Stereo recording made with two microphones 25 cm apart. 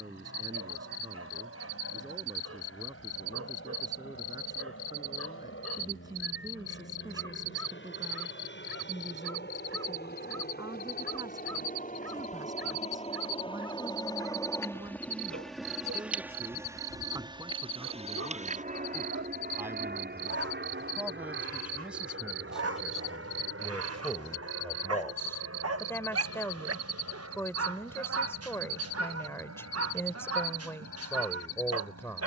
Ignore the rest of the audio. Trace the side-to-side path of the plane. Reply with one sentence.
You can hear the plane go from the left side to the right.